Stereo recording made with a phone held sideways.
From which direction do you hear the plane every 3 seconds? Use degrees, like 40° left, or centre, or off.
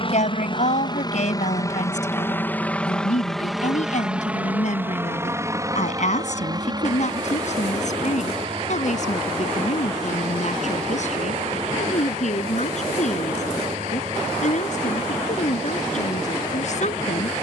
30° left, 10° right, 30° right, 40° right, 50° right, 50° right.